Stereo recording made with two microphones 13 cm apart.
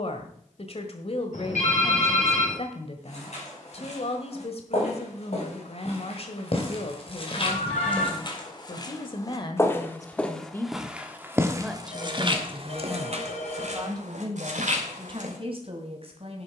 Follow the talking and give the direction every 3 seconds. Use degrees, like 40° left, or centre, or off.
50° left, 50° left, 50° left, 20° left, 30° right, 50° right.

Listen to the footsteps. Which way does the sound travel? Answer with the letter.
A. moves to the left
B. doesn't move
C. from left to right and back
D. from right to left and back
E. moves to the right
E.